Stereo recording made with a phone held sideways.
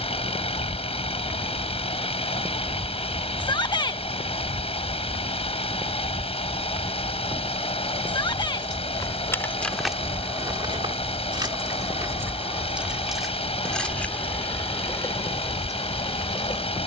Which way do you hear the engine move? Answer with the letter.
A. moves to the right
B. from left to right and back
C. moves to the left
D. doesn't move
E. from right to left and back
D.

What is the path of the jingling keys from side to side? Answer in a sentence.
In this clip you hear the jingling keys move from left to right and back again.